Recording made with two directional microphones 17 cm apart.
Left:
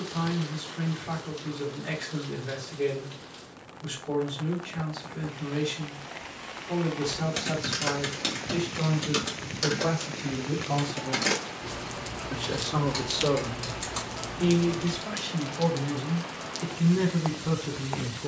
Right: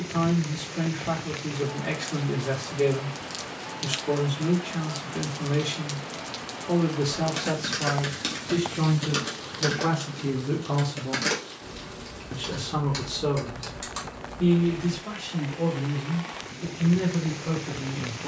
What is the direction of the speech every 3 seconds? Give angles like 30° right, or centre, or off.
60° right, 60° right, 60° right, 30° right, centre, 20° left.